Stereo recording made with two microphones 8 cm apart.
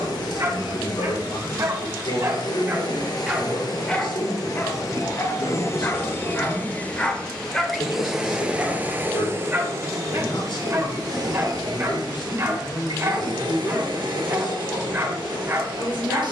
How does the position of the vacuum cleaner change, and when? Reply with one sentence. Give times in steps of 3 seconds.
In this clip you hear the vacuum cleaner on the left from 0 s, in the centre from 6 s and on the right from 9 s.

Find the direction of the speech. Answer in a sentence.
You can hear the speech on the left.